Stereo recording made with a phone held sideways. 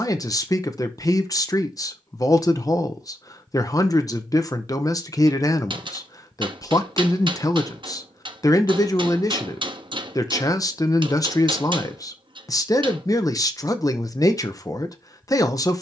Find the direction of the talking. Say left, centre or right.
left.